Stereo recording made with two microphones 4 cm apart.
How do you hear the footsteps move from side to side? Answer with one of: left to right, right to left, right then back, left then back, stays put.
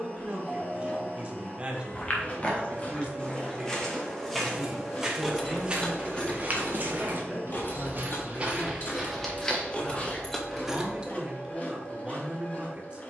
right then back.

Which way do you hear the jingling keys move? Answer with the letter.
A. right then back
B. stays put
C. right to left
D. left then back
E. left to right
D.